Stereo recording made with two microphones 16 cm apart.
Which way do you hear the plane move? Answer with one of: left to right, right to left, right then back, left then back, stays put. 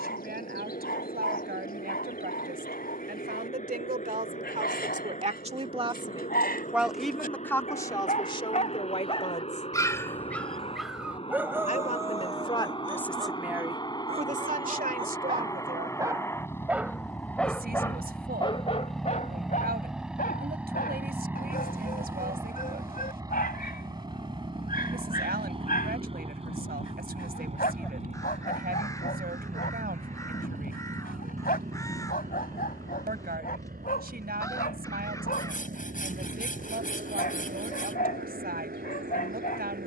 left to right.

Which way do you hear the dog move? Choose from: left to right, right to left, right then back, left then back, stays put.
right then back.